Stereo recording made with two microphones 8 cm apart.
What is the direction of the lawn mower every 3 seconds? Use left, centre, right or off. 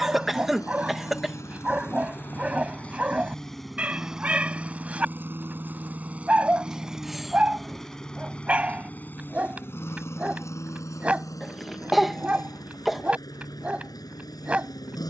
left, centre, centre, left, left.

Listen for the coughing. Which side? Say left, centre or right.
centre.